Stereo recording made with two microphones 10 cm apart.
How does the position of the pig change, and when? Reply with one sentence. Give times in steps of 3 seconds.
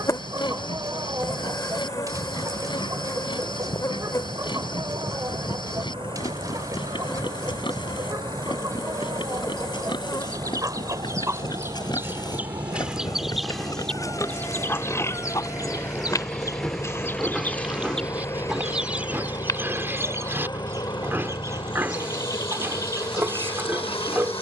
You can hear the pig on the left from 0 s, in the centre from 15 s and on the right from 18 s.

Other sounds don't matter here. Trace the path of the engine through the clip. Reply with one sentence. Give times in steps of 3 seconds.
In this clip you hear the engine on the right from 0 s, in the centre from 15 s and on the left from 18 s.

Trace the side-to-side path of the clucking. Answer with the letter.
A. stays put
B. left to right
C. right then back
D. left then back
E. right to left
D.